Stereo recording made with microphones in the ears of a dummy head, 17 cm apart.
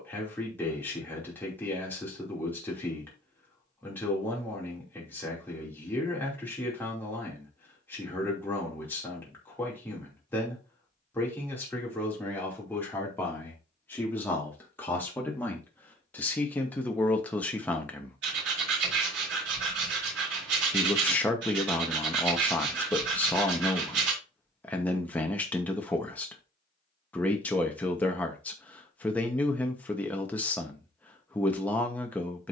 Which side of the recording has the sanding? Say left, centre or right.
right.